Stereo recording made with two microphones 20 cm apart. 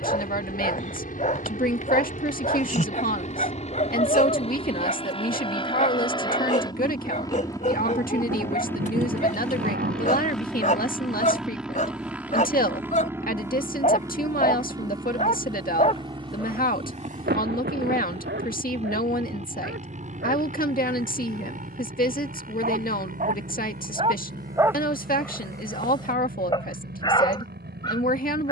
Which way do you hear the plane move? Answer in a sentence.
You can hear the plane travel towards the right.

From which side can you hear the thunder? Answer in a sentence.
In this clip you hear the thunder on the right.